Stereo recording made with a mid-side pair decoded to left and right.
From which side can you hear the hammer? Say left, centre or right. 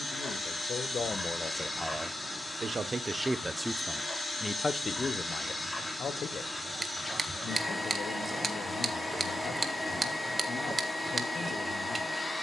right.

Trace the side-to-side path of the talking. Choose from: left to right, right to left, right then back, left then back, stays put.
right then back.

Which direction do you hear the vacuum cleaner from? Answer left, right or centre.
centre.